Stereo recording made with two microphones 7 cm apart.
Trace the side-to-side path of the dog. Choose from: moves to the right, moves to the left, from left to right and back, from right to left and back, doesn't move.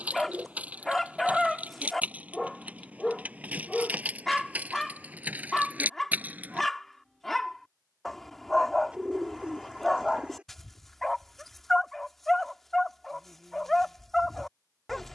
doesn't move.